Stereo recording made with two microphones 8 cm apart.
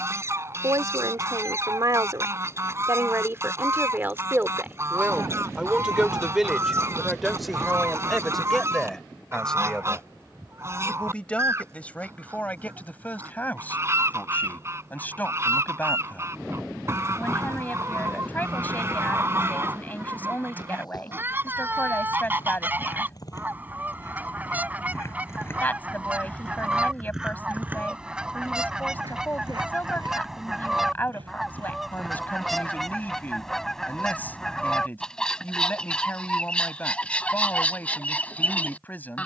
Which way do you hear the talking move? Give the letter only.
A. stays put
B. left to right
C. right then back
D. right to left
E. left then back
D.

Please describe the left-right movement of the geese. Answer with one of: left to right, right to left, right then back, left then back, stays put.
right to left.